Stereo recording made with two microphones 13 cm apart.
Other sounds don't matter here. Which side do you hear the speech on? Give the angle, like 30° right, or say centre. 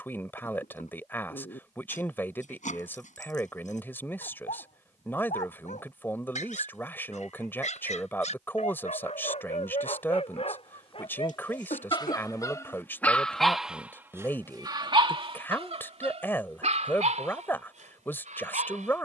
20° left.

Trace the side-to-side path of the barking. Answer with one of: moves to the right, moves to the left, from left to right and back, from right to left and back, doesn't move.
moves to the right.